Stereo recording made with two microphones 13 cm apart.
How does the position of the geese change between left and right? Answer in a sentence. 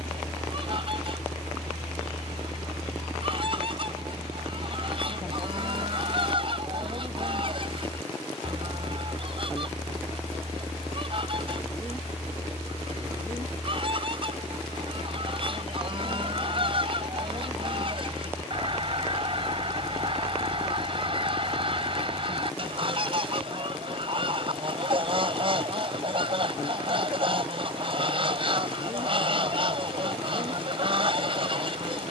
In this clip you hear the geese stay in one place.